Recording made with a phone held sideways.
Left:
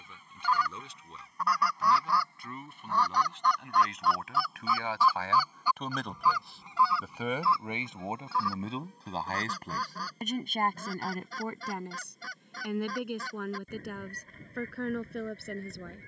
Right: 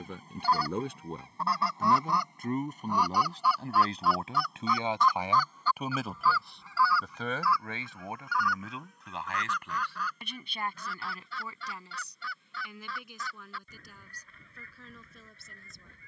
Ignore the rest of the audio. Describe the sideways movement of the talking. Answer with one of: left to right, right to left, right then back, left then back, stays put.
right to left.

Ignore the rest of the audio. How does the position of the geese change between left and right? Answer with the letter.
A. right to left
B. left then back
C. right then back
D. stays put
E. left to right
A.